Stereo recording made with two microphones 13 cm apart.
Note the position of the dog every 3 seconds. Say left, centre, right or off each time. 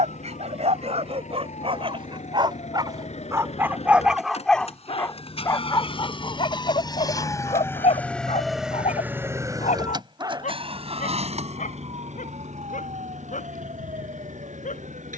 right, centre, left, left, left.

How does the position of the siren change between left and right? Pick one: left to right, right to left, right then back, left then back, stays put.
left to right.